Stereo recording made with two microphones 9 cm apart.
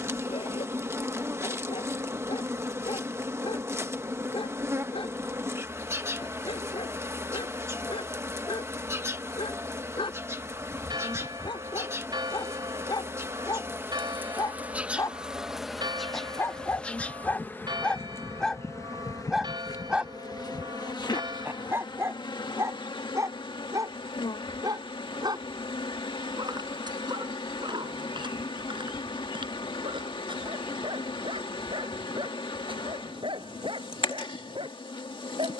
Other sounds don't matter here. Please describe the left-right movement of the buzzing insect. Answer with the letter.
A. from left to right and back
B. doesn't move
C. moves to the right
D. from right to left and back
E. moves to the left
E.